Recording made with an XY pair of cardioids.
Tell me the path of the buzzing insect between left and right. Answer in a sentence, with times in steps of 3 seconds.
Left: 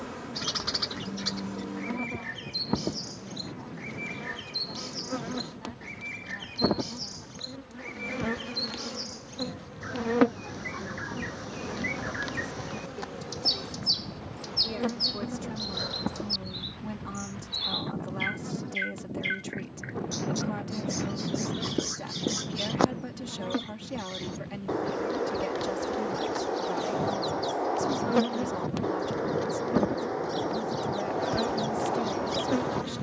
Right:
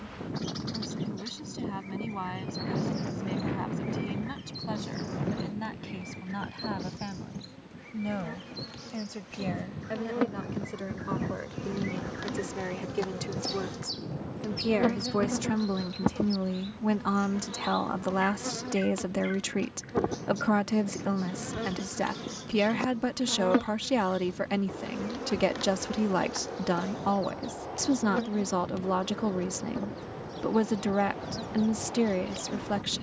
In this clip you hear the buzzing insect on the left from 0 s, in the centre from 12 s, on the right from 15 s, in the centre from 24 s and on the left from 27 s.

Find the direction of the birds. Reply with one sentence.
In this clip you hear the birds on the left.